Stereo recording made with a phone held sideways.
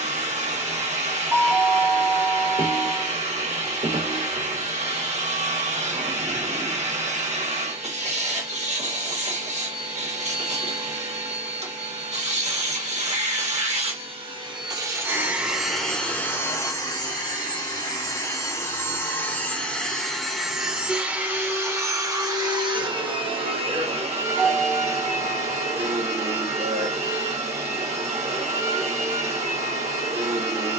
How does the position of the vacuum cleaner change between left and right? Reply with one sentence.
You can hear the vacuum cleaner move from right to left and back again.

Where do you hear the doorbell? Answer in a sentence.
You can hear the doorbell in the centre.